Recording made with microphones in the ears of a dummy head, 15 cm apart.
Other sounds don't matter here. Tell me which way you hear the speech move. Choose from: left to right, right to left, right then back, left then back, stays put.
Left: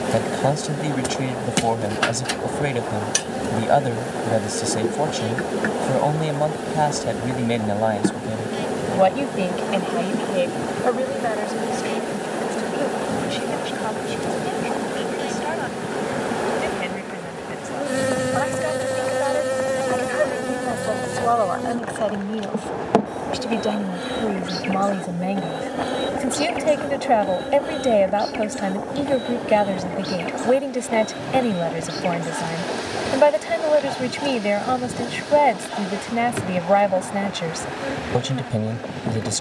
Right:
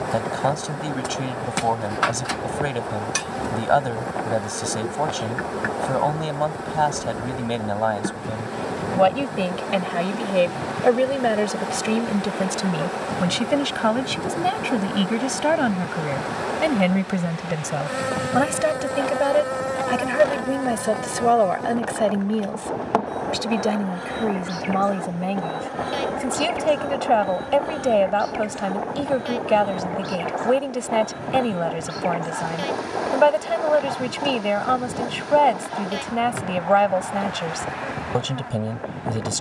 right then back.